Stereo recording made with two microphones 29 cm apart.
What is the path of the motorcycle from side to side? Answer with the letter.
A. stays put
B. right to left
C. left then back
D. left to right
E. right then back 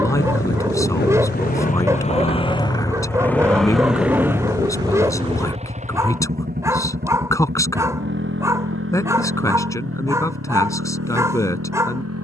D.